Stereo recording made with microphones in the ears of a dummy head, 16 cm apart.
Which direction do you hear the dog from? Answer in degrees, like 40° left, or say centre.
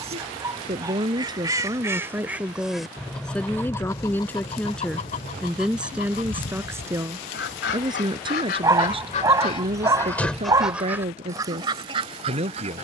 20° right.